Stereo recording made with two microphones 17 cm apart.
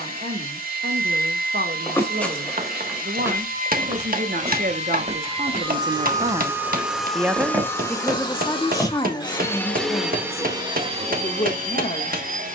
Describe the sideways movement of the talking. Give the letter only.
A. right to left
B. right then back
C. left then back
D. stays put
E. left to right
A.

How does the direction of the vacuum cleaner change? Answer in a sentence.
In this clip you hear the vacuum cleaner go left and come back.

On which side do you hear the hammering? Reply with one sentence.
You can hear the hammering on the right.